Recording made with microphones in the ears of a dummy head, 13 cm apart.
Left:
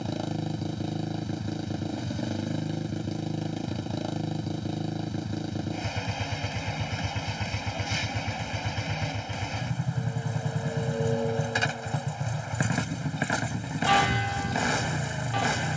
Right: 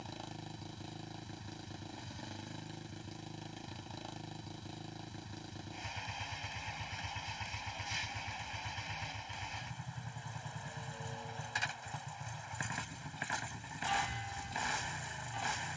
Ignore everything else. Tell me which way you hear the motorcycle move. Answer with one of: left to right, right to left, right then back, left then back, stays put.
stays put.